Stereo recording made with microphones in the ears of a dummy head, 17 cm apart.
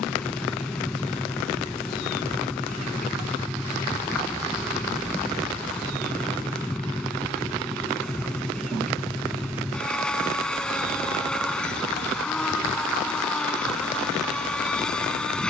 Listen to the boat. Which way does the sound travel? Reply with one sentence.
In this clip you hear the boat stay in one place.